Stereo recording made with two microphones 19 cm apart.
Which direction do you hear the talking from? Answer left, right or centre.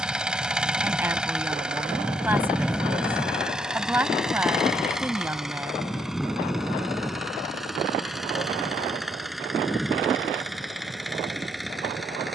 centre.